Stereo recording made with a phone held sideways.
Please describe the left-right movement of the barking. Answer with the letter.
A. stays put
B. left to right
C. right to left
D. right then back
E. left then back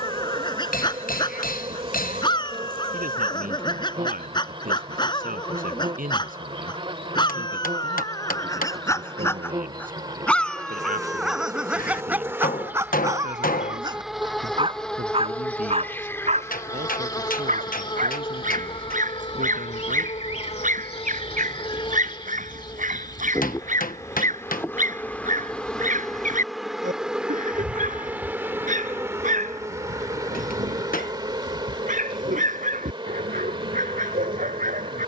B.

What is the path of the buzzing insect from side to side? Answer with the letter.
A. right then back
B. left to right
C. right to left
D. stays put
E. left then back
E.